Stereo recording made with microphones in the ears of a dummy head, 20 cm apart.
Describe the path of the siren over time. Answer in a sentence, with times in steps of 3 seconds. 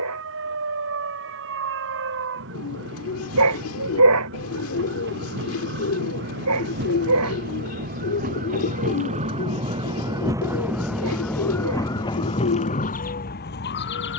In this clip you hear the siren on the right from 0 s, in the centre from 9 s and on the left from 12 s.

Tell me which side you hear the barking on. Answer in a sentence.
You can hear the barking on the right.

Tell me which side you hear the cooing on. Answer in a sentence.
You can hear the cooing on the left.